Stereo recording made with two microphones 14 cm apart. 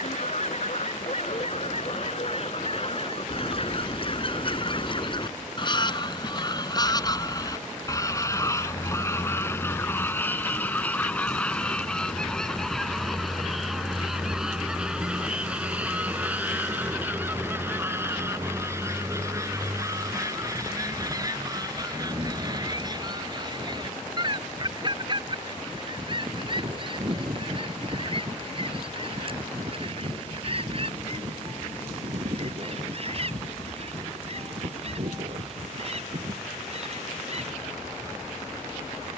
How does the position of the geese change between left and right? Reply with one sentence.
You can hear the geese move from left to right.